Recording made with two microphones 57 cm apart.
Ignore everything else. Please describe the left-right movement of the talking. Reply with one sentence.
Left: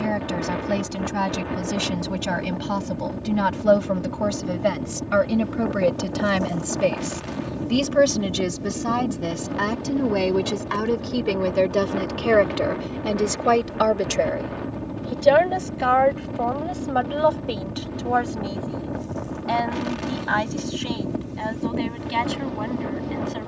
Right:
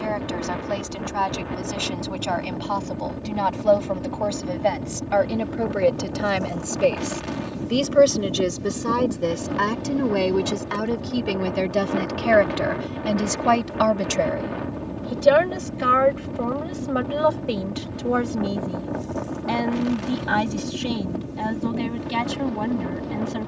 In this clip you hear the talking go from the left side to the right.